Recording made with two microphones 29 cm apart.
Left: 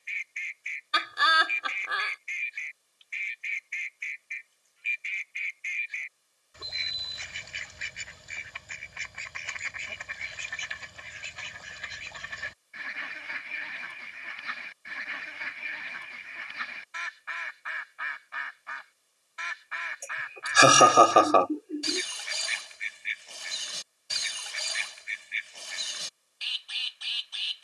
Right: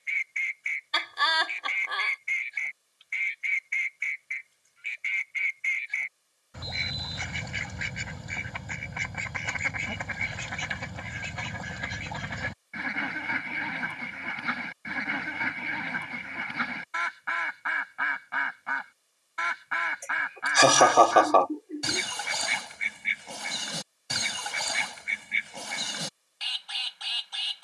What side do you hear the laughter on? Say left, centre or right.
centre.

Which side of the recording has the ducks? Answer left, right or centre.
right.